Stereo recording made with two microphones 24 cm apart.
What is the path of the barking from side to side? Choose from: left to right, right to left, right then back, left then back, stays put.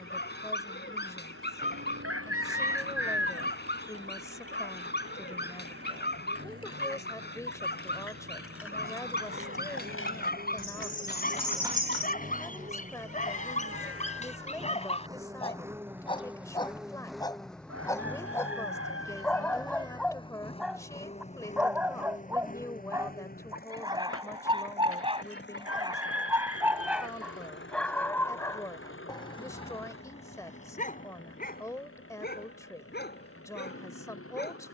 right then back.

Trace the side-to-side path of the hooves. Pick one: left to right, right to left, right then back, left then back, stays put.
left to right.